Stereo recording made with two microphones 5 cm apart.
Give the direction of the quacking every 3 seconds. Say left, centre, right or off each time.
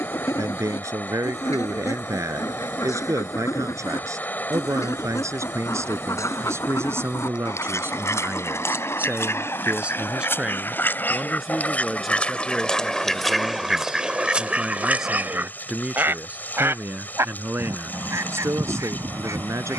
left, left, left, left, centre, right, right.